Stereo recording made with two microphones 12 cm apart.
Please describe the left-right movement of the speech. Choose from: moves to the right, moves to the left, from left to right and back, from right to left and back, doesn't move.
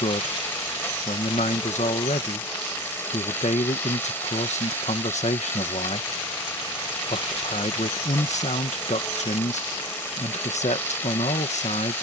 doesn't move.